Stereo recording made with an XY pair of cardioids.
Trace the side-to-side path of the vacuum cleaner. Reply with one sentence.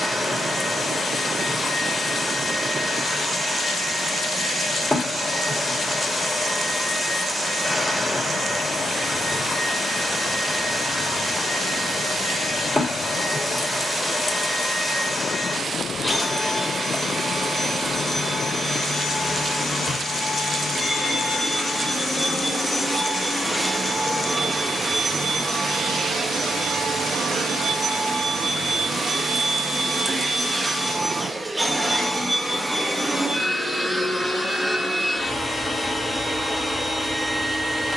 You can hear the vacuum cleaner go right and come back.